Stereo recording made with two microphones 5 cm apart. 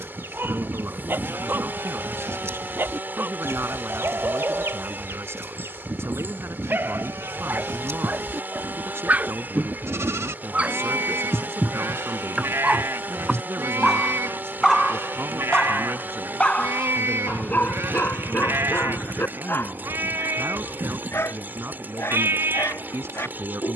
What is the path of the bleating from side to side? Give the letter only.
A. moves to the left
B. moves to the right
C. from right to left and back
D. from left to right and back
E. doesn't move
E.